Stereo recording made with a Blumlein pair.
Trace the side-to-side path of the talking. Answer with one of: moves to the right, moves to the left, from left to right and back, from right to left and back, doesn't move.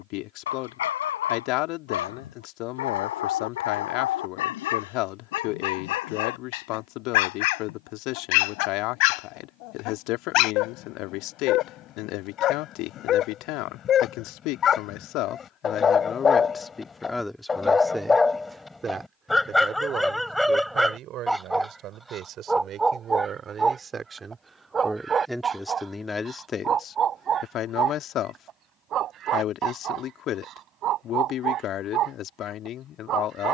from left to right and back.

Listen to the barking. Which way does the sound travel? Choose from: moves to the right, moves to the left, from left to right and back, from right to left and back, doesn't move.
moves to the right.